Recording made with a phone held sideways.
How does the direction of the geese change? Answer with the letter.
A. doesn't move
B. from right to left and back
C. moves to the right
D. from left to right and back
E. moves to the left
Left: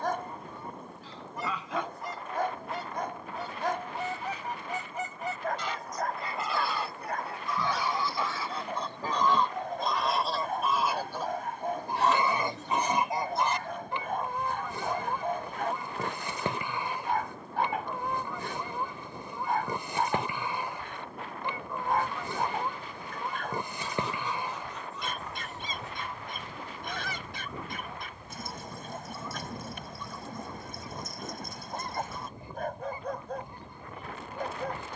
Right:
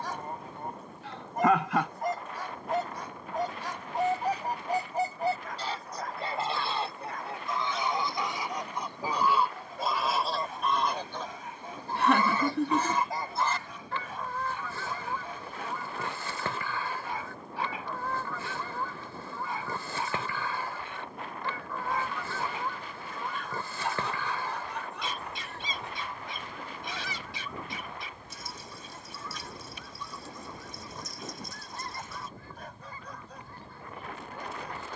E.